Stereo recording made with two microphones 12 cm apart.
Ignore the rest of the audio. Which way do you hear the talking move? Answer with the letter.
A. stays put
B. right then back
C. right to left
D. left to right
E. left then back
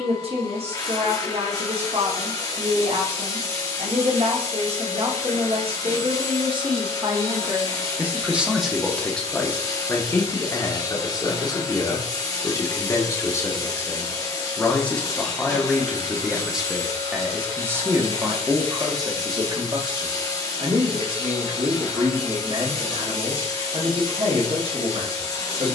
E.